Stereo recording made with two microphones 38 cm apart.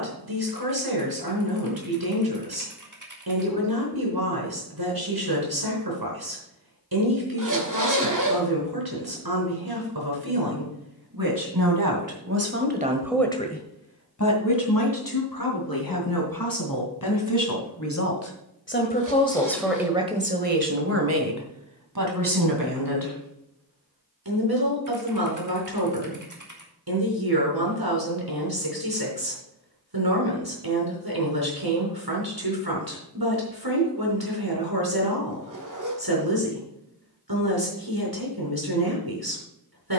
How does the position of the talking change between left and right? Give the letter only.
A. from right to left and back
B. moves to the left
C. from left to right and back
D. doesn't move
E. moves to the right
A.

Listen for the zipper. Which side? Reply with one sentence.
You can hear the zipper on the right.